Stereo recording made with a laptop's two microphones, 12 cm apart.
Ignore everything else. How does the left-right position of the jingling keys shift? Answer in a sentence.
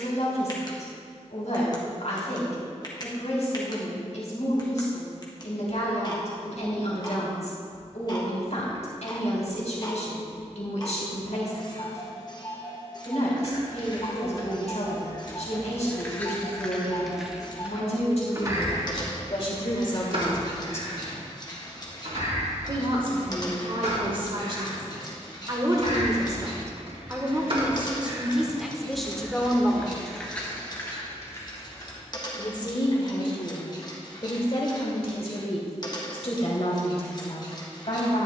In this clip you hear the jingling keys go right and come back.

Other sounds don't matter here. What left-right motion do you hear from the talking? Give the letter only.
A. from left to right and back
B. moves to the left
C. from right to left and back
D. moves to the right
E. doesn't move
A.